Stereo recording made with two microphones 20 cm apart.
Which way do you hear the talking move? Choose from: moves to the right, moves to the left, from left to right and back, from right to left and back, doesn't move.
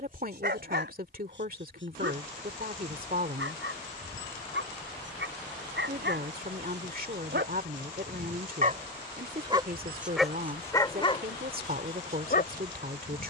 doesn't move.